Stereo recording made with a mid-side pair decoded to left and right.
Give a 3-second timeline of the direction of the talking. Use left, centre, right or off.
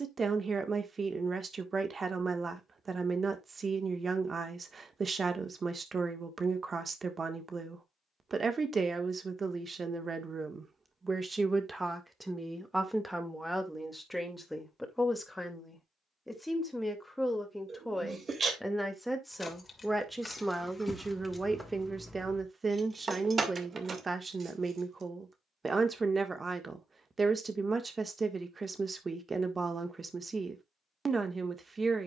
right, right, right, right, centre, centre, centre, right, right, right, right.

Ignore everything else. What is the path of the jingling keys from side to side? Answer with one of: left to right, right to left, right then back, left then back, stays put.
left to right.